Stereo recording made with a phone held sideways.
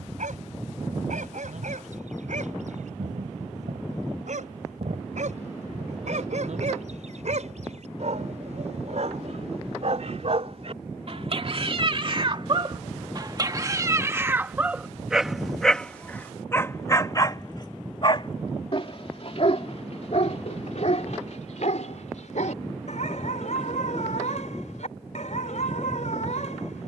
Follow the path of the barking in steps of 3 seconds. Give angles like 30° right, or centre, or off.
70° right, 70° right, 70° right, 50° right, 30° right, 10° left, 50° left, 70° left, 70° left.